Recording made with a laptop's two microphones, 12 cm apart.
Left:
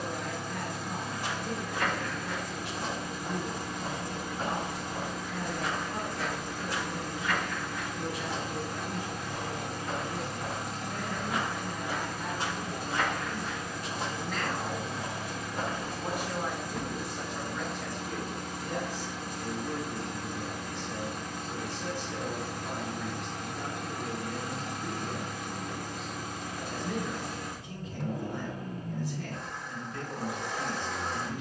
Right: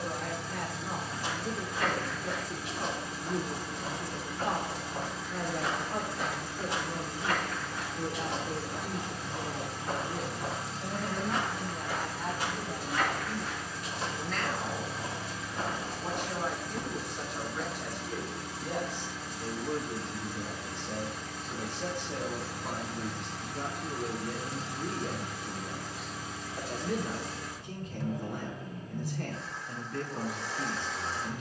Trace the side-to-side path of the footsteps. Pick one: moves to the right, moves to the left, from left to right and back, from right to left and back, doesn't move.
from left to right and back.